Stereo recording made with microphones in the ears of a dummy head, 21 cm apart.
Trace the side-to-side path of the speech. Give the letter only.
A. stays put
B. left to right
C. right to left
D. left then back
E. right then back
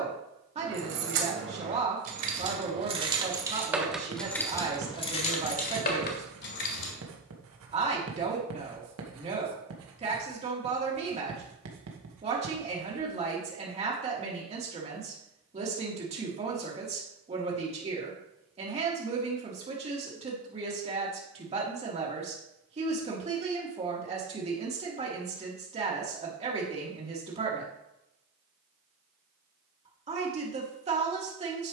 A.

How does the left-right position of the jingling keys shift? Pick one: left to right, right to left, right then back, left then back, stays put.
right to left.